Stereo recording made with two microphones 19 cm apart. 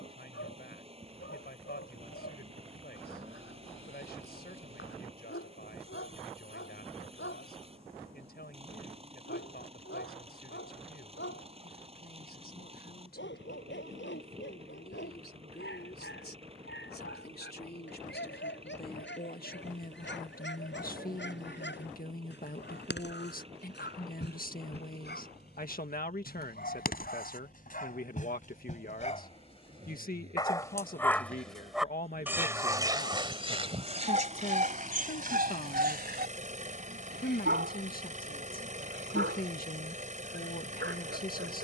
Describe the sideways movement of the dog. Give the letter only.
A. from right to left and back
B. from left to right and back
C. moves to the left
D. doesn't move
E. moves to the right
E.